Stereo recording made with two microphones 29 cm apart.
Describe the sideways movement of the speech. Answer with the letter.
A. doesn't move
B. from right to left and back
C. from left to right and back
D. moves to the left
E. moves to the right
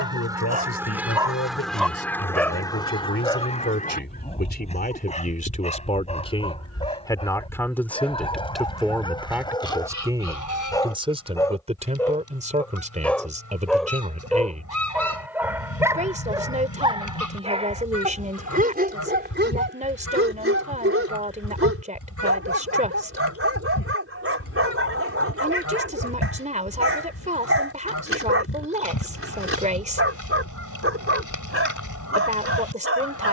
E.